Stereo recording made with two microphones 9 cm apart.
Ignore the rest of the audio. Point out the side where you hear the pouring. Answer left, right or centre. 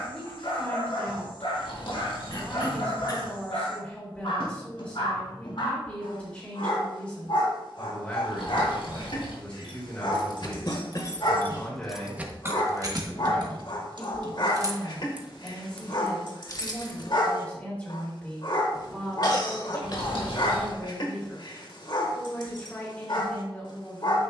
left.